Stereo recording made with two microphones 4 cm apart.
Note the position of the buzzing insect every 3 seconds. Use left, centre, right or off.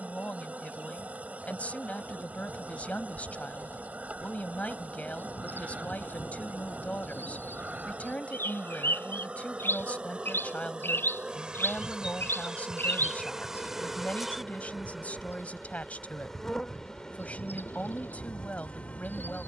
right, right, right, right, centre, centre, left.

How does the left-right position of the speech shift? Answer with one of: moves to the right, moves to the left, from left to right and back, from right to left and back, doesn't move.
doesn't move.